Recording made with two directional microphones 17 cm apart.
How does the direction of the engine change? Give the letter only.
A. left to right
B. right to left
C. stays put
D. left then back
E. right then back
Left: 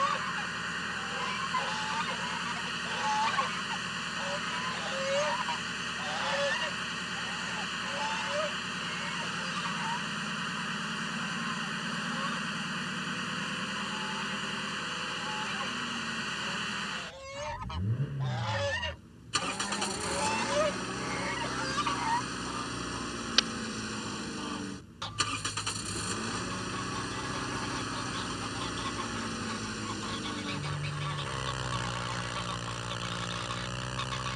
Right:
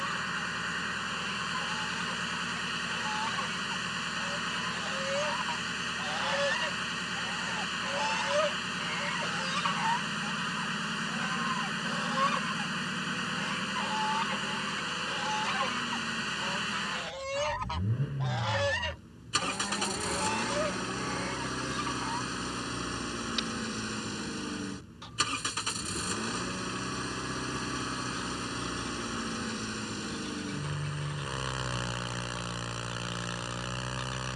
C.